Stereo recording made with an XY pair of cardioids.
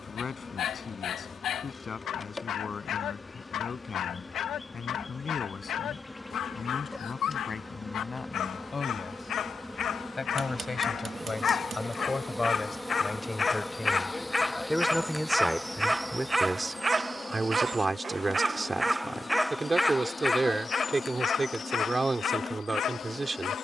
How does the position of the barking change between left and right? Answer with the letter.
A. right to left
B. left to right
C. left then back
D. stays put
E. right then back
E.